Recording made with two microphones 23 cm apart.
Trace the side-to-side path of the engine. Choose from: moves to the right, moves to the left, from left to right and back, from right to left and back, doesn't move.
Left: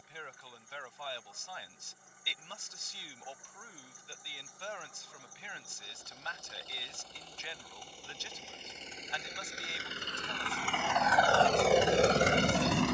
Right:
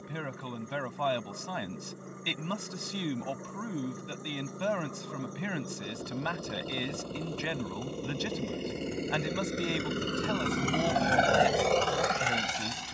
moves to the left.